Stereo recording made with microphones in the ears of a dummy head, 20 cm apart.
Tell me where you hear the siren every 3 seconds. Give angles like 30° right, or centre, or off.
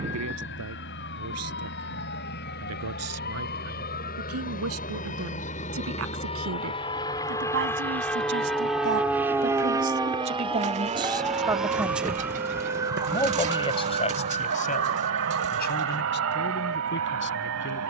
50° left, 40° left, 30° left, 10° left, 20° right, 40° right.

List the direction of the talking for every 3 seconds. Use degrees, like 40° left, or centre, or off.
70° right, 70° right, 60° right, 20° right, 20° left, 50° left.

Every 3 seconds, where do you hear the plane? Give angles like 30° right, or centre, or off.
60° left, 40° left, 10° left, 20° right, 50° right, 60° right.